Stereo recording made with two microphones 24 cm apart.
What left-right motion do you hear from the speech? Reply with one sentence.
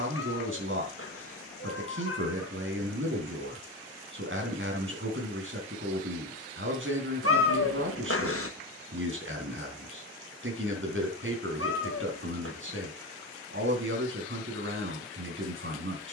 In this clip you hear the speech stay put.